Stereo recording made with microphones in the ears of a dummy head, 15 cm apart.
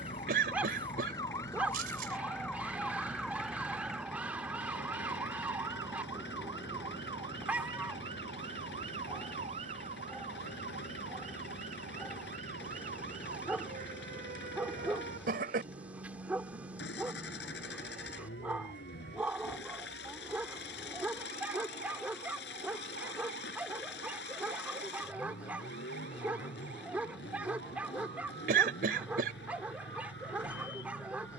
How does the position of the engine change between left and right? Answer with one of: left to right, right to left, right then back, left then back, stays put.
stays put.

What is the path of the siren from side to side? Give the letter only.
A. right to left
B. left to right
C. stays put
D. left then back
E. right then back
B.